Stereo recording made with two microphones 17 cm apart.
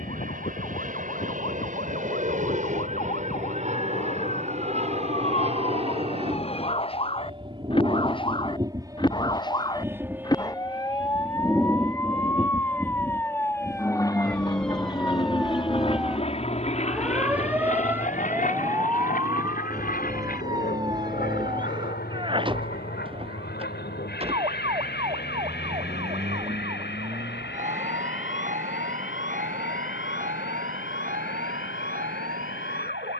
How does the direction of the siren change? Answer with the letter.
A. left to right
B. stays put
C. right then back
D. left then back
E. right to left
A.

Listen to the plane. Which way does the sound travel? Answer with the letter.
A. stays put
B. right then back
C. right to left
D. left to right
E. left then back
C.